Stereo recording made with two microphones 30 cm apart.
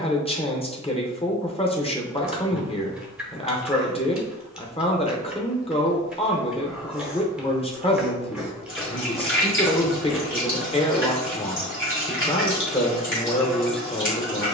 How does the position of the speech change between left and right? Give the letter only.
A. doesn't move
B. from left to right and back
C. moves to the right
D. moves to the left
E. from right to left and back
A.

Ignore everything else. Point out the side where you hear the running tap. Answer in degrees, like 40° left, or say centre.
40° left.